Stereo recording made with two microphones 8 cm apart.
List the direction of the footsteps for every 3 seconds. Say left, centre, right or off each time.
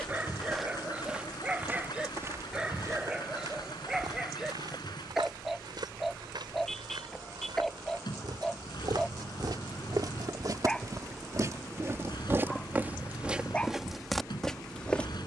right, right, right, right, centre.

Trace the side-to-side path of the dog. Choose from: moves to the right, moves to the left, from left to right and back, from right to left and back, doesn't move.
moves to the left.